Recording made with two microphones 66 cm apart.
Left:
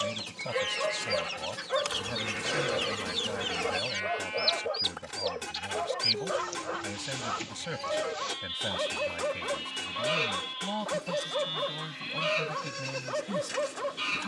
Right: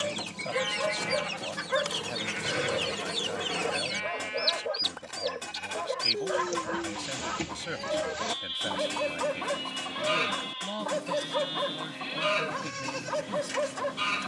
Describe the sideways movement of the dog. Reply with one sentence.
You can hear the dog stay in one place.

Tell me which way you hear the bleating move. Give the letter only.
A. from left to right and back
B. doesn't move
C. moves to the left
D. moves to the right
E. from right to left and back
E.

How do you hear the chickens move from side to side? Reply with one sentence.
You can hear the chickens stay put.